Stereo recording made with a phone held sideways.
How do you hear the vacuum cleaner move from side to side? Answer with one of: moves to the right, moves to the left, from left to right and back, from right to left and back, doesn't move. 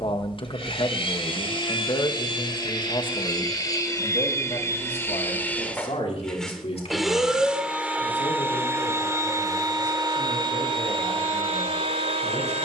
moves to the right.